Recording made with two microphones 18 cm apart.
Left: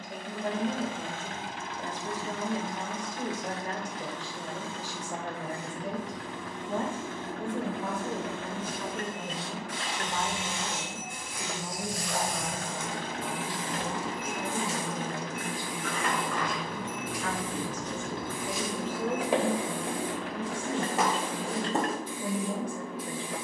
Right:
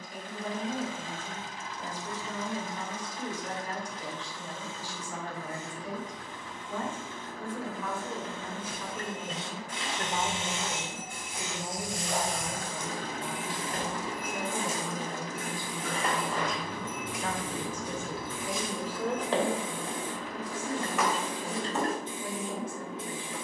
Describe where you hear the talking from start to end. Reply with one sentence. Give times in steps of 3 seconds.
You can hear the talking on the left from 0 s, on the right from 9 s, in the centre from 18 s and on the left from 21 s.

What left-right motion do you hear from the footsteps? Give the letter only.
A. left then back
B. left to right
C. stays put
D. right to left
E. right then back
D.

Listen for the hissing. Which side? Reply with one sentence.
In this clip you hear the hissing on the right.